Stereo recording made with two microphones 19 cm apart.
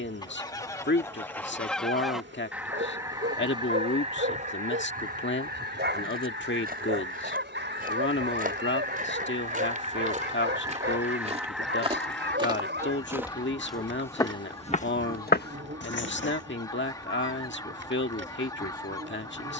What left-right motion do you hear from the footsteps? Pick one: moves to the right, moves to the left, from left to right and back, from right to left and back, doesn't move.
moves to the left.